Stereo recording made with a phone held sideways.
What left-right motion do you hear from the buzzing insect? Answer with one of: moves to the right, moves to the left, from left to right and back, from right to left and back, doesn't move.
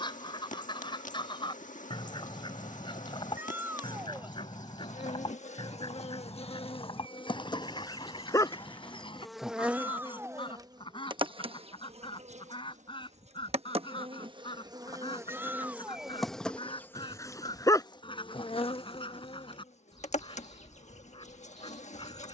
from left to right and back.